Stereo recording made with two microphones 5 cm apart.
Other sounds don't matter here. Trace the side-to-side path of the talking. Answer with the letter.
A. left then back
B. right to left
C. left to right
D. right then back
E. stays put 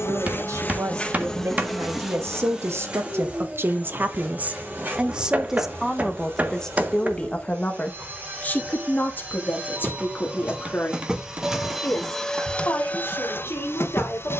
B.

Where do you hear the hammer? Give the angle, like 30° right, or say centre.
30° right.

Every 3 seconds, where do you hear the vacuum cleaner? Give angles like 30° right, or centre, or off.
10° left, 30° right, 40° right, 20° right, 40° left.